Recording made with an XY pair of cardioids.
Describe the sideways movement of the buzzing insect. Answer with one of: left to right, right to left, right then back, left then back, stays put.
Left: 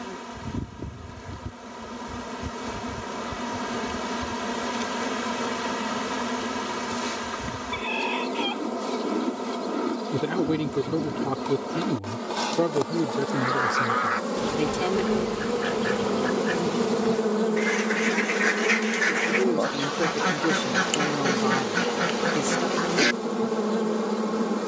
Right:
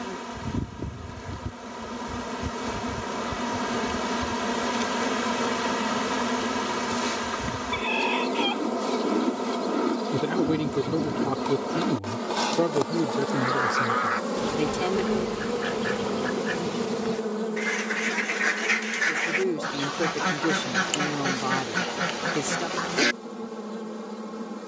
right to left.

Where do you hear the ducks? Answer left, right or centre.
centre.